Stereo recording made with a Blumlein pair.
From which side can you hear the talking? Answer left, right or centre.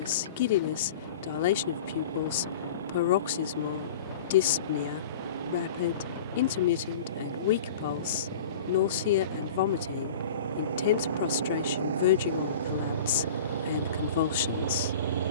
left.